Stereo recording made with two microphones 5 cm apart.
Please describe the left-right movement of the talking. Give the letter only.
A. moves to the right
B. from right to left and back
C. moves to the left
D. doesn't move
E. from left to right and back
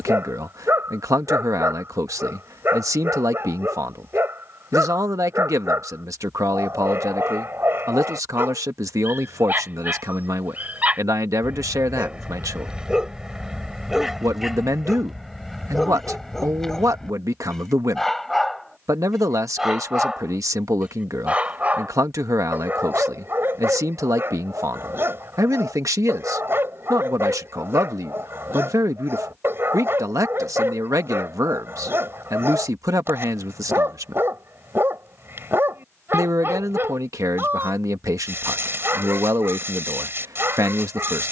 D.